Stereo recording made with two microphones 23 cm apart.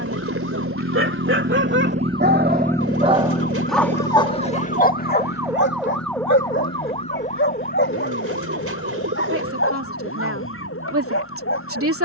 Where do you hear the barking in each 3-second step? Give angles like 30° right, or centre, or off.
60° right, 20° left, 60° left, 70° left.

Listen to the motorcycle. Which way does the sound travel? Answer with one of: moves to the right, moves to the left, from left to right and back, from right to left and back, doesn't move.
moves to the left.